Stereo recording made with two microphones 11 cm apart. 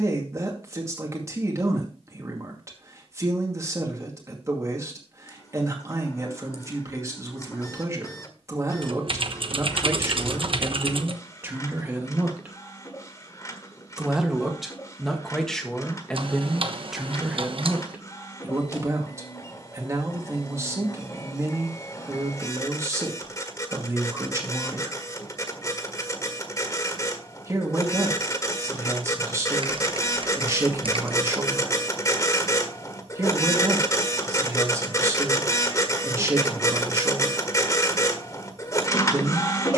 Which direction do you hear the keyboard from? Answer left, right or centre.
right.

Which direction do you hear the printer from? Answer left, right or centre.
left.